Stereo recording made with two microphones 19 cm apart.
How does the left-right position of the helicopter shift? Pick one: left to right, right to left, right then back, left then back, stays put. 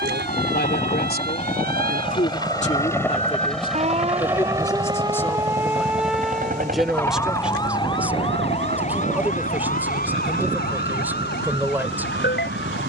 left to right.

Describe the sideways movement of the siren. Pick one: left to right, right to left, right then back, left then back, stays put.
right to left.